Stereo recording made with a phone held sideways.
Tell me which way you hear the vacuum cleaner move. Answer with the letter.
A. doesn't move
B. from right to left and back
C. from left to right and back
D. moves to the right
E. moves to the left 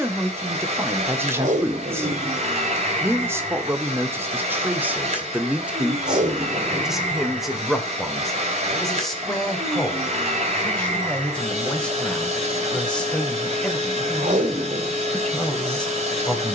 A.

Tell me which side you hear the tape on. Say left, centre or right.
right.